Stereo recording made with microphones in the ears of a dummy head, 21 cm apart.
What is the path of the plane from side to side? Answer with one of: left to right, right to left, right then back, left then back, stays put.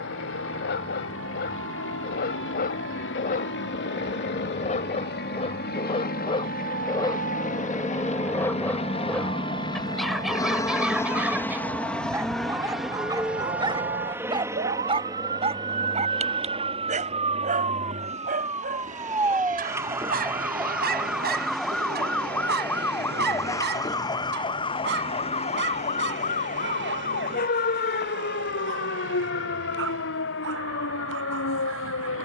left to right.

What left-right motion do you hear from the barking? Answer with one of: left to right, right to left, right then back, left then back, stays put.
left to right.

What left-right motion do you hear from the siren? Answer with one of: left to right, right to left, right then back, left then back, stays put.
right to left.